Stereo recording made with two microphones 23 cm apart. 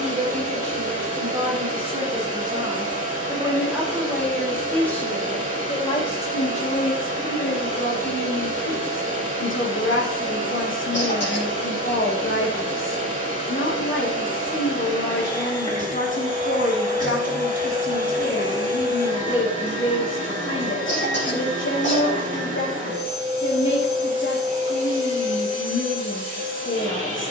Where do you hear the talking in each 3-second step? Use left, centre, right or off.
right, centre, left, left, left, left, left, left, left.